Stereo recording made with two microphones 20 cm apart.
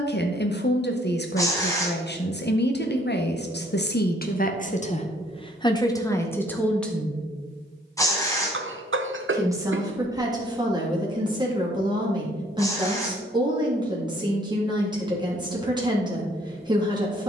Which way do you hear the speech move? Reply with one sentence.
In this clip you hear the speech go from the left side to the right.